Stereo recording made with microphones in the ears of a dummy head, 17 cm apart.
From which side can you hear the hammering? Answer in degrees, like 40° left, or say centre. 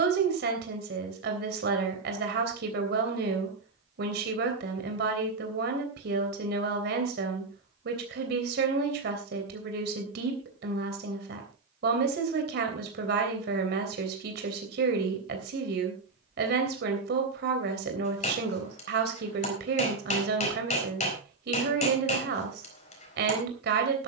40° left.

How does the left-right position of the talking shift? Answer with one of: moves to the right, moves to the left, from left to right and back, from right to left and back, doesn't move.
doesn't move.